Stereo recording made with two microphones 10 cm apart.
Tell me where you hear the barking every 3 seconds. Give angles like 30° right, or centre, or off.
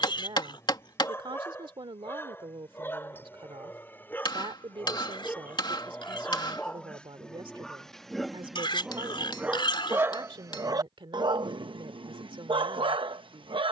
30° left, 20° left, 10° left, 30° right, 60° right.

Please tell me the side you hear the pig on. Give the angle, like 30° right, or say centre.
60° left.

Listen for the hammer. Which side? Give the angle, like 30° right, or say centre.
50° left.